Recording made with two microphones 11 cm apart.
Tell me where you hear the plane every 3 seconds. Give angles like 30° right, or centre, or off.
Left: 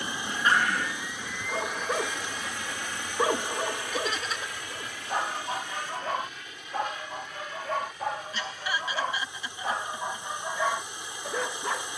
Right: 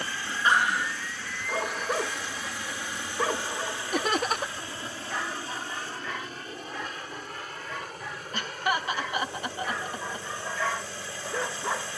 centre, 20° right, 40° right, 50° right.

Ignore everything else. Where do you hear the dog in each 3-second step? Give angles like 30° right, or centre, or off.
10° right, 30° left, 50° left, 20° left.